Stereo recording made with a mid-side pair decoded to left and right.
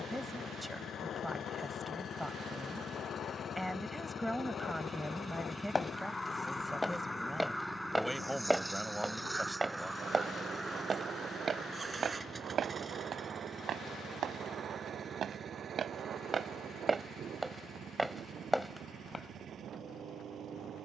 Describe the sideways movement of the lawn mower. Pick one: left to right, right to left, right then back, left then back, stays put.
left to right.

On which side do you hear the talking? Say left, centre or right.
centre.